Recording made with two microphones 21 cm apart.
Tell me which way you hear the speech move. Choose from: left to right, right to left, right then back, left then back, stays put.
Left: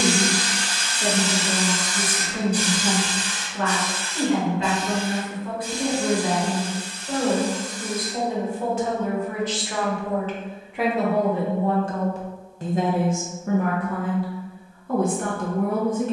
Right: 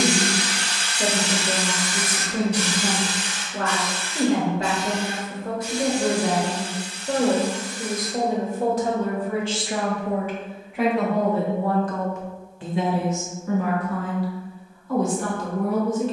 right to left.